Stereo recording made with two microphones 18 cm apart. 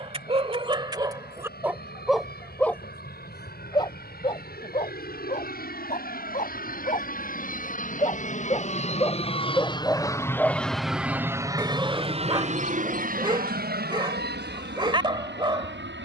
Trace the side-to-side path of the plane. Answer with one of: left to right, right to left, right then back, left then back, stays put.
left to right.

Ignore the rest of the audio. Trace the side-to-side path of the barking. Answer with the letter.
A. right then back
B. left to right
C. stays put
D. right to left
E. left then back
E.